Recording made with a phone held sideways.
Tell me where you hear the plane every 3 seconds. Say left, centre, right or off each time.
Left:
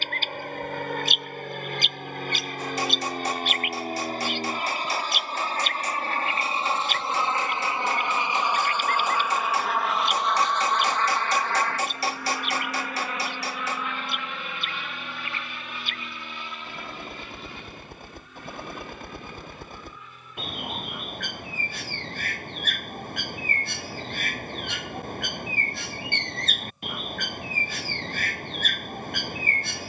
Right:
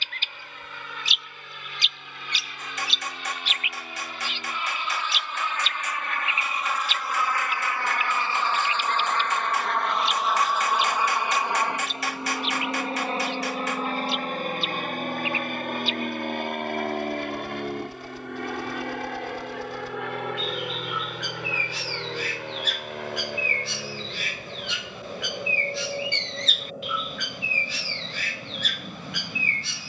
left, left, left, centre, right, right, right, right, right, right.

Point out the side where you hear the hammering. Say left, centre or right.
left.